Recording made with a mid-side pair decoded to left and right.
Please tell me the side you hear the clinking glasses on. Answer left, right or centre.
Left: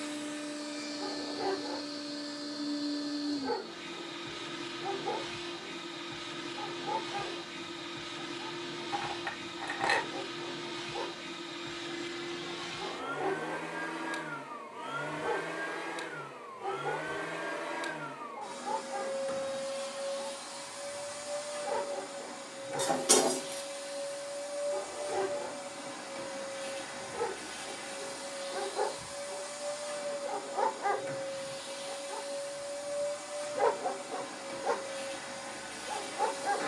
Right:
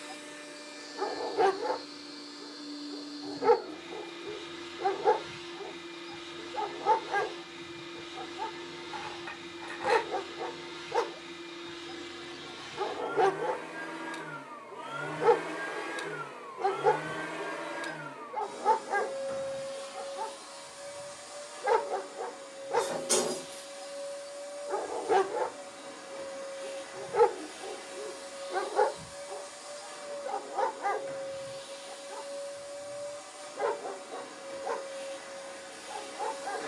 left.